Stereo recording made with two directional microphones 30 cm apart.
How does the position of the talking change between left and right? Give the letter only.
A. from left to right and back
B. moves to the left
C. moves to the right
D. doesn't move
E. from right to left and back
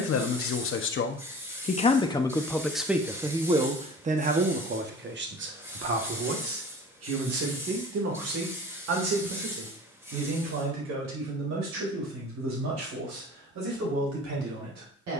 C.